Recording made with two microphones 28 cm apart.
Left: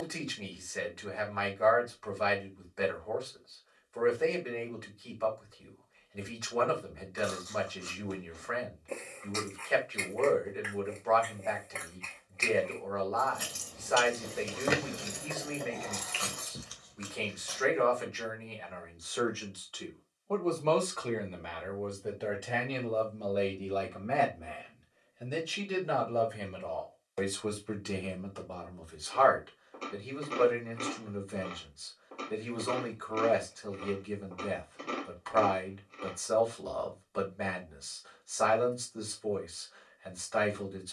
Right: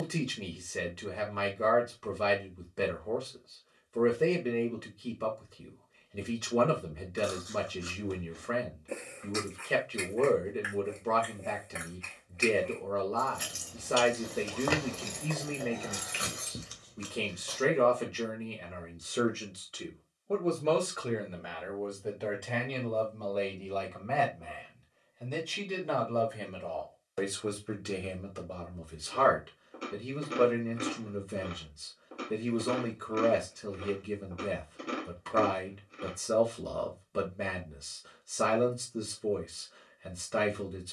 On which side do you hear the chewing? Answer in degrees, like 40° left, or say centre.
10° right.